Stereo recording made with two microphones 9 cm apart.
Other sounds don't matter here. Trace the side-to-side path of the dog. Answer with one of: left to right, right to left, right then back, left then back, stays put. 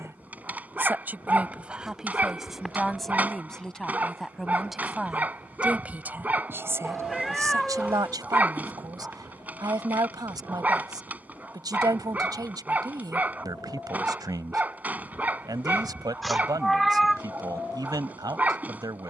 stays put.